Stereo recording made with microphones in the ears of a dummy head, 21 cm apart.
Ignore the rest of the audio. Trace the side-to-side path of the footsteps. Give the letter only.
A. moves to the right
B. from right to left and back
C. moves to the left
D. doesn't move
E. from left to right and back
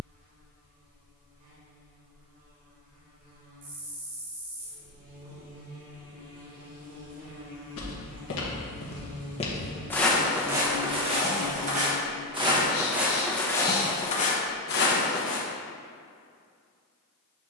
E.